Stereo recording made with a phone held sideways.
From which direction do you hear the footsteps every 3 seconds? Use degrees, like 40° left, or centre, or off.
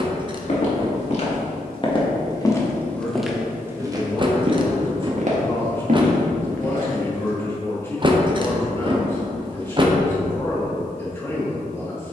40° left, 30° right, 70° right, off.